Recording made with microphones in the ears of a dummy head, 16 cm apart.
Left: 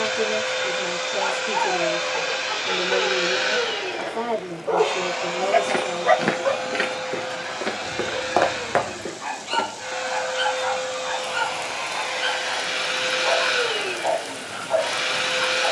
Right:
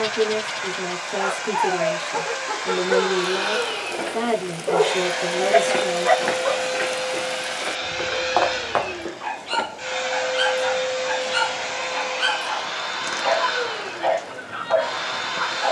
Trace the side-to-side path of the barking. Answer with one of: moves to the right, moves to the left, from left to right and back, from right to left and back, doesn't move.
from right to left and back.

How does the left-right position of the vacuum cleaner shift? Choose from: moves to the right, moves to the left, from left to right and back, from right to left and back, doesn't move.
from left to right and back.